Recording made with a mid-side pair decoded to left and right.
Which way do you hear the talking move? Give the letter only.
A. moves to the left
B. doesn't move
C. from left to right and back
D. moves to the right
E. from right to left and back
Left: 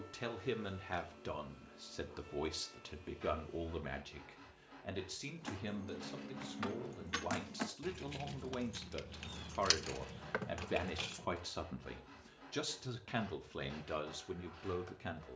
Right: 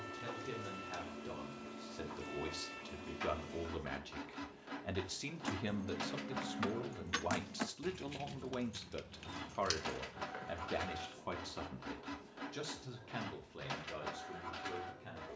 C.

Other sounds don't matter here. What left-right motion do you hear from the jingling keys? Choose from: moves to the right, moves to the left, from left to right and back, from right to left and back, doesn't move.
moves to the left.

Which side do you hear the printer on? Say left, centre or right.
right.